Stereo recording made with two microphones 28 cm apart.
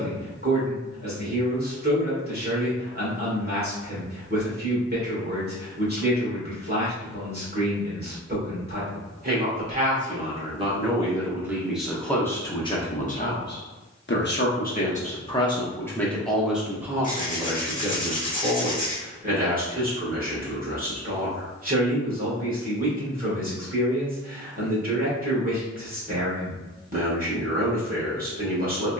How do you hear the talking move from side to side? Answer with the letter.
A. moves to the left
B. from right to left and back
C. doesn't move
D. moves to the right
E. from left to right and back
B.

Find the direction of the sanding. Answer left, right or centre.
left.